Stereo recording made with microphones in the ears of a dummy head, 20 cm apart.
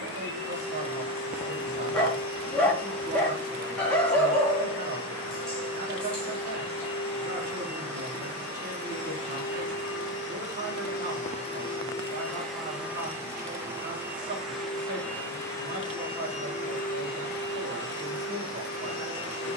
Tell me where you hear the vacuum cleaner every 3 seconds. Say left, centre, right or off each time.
left, left, left, left, centre, left, left.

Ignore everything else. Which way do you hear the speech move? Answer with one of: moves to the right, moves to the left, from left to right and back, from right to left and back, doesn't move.
doesn't move.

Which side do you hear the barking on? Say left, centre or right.
centre.